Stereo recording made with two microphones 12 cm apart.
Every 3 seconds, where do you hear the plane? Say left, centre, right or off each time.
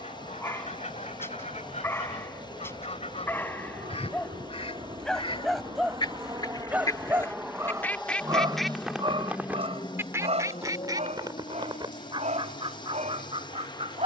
right, right, centre, left, left.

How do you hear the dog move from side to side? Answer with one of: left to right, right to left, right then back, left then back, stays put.
left to right.